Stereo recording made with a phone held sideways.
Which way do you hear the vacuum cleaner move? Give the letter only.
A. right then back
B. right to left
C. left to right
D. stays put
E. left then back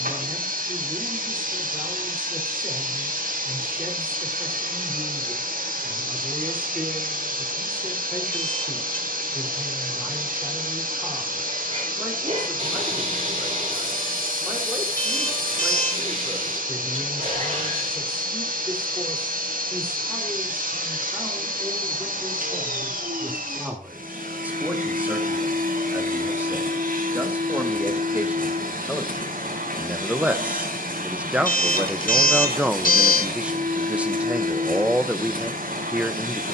D.